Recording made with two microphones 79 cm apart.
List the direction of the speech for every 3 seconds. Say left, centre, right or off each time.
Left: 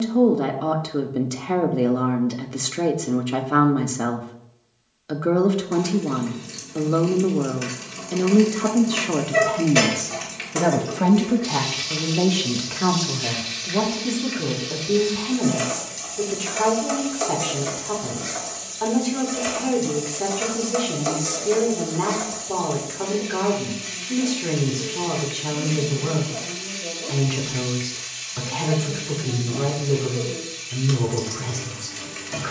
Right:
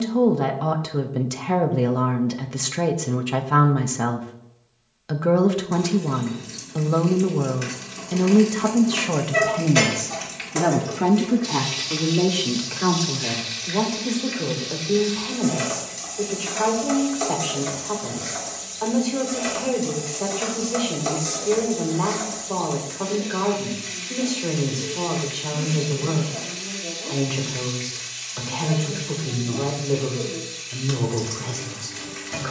right, right, right, centre, left, left, left, left, left, left, left.